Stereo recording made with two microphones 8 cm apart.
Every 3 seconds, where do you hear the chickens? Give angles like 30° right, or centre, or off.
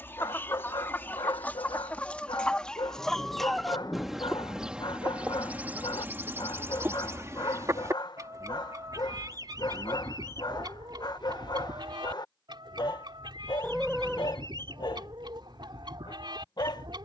20° left, 10° right, 40° right, 60° right, 60° right, 60° right.